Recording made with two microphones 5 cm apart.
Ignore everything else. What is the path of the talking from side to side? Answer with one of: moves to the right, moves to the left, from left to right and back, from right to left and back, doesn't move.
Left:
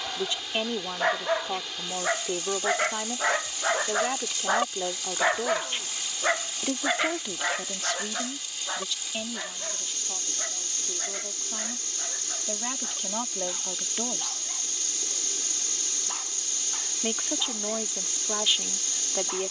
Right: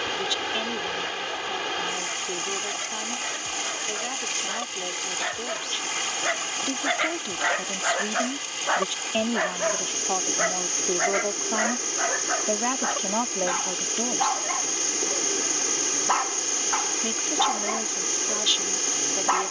from left to right and back.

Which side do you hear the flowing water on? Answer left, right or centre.
right.